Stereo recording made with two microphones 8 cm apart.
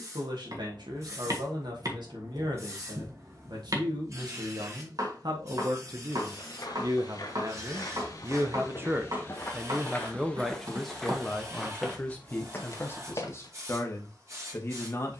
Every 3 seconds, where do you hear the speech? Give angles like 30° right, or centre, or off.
80° right, 70° right, 50° right, centre, 30° left.